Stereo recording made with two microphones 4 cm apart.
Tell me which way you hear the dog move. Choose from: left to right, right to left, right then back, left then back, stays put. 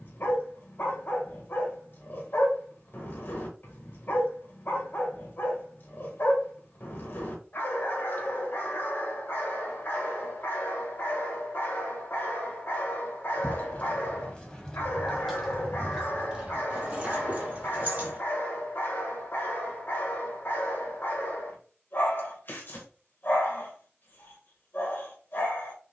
stays put.